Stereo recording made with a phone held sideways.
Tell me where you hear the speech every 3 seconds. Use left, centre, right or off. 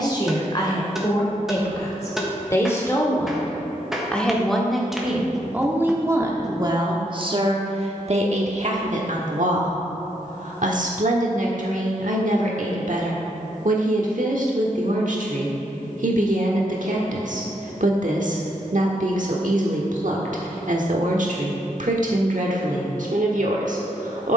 left, centre, right, right, right, right, right, right.